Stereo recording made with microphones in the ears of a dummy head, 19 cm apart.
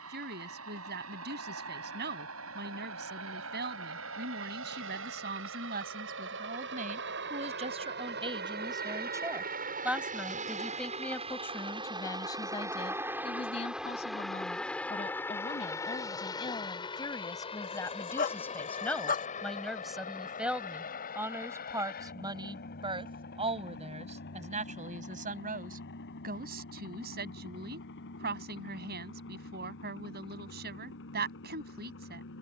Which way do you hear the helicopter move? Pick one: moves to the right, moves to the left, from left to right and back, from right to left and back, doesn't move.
moves to the left.